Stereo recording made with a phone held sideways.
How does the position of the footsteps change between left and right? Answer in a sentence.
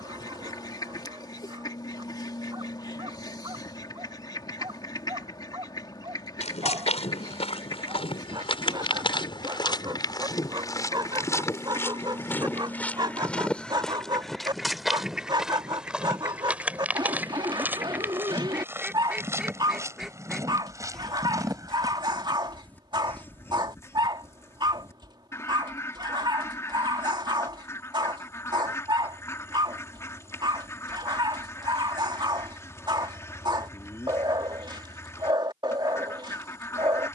In this clip you hear the footsteps move to the right.